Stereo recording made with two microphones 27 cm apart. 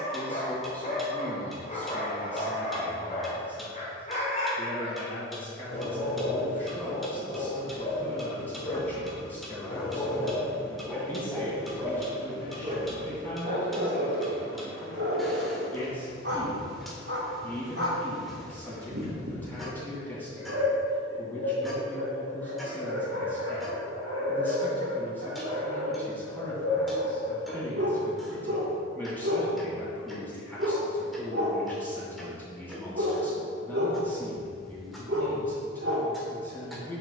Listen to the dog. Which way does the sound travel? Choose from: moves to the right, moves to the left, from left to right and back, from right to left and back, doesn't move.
moves to the right.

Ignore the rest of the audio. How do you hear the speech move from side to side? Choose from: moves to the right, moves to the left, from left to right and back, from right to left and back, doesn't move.
doesn't move.